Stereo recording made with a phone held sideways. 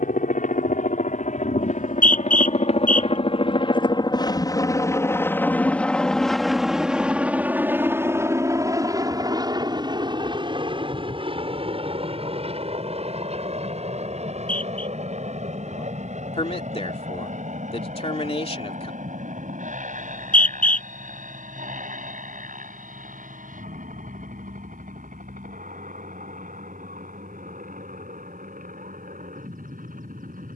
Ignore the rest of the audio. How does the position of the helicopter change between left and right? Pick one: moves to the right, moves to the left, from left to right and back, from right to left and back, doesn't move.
moves to the right.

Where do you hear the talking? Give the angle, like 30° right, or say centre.
40° left.